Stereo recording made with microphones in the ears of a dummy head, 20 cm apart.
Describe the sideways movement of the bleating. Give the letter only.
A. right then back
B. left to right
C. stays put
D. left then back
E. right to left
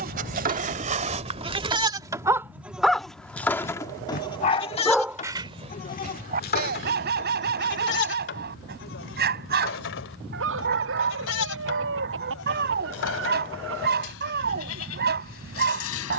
E.